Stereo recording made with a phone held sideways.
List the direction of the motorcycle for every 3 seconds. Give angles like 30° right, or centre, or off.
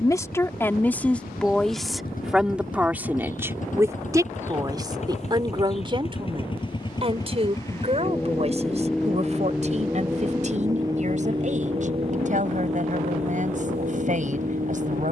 60° left, 50° left, 20° left, 20° right, 50° right.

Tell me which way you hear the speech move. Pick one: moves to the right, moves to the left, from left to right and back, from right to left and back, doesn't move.
moves to the right.